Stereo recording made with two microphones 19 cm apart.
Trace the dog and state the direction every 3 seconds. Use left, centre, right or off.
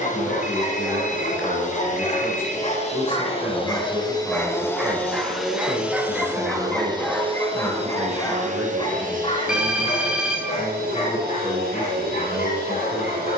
left, centre, centre, left, left.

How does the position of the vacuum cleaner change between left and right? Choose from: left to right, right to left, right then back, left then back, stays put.
left to right.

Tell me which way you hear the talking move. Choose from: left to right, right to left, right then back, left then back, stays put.
stays put.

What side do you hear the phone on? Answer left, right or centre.
centre.